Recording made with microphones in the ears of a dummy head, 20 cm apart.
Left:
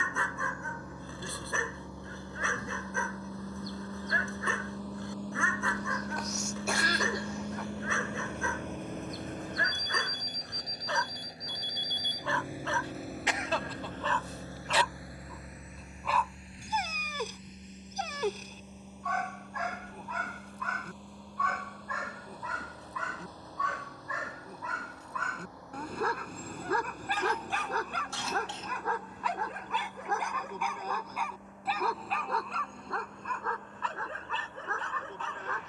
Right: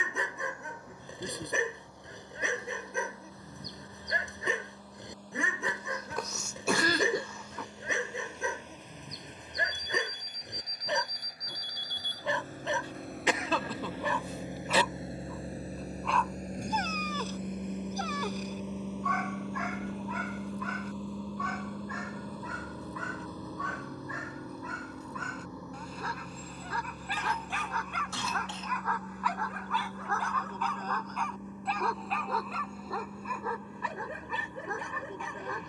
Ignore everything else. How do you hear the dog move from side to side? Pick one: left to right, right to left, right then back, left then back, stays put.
left then back.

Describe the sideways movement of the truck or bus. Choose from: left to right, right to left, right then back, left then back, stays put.
left to right.